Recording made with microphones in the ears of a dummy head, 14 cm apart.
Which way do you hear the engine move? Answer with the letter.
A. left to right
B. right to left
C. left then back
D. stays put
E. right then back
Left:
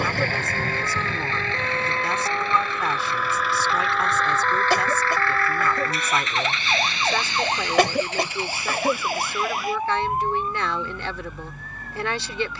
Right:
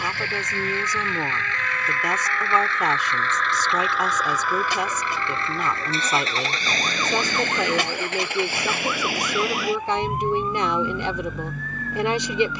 A.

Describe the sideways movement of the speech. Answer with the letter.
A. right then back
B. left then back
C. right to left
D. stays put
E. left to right
D.